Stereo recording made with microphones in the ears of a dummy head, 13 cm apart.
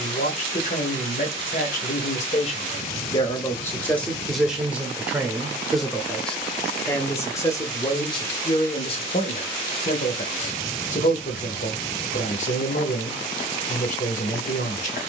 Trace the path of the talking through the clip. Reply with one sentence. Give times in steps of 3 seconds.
You can hear the talking on the left from 0 s, in the centre from 3 s and on the left from 6 s.